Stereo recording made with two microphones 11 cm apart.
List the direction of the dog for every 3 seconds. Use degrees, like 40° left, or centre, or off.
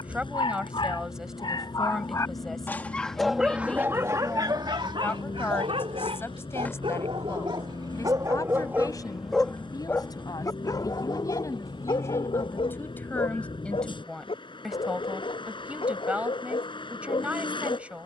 40° left, 40° right, 40° right, 30° left, 60° left, 60° left.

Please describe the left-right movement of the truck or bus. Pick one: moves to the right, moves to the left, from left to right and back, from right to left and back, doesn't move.
doesn't move.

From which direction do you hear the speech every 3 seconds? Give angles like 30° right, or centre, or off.
centre, 10° left, 30° left, 30° left, 10° left, 10° right.